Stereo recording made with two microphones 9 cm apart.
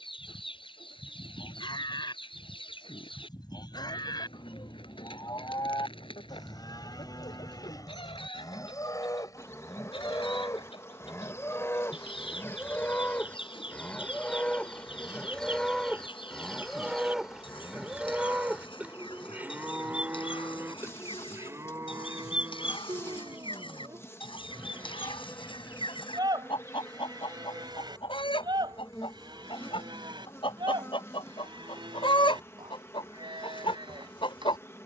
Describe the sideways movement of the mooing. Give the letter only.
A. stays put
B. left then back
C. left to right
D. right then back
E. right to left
C.